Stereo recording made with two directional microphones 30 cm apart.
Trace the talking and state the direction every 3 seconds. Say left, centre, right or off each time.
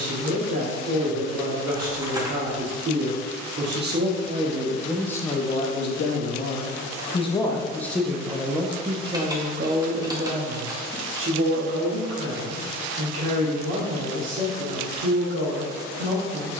right, centre, centre, right, right, right.